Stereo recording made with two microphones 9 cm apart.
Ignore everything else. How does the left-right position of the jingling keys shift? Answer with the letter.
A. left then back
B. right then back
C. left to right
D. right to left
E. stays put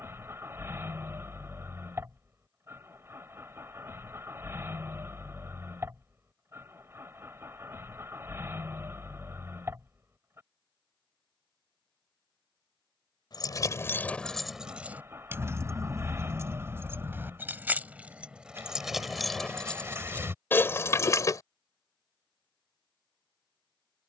B.